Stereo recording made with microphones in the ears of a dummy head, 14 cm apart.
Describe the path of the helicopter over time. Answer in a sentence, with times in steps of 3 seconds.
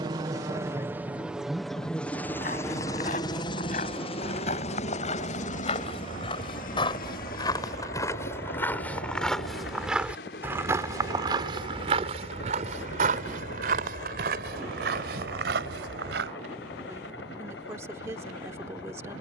In this clip you hear the helicopter in the centre from 0 s and on the left from 3 s.